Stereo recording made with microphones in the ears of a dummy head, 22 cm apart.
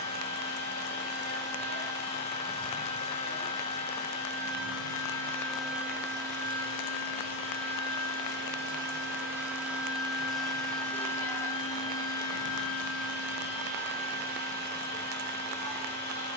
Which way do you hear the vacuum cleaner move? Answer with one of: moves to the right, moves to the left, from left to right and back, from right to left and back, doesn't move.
from left to right and back.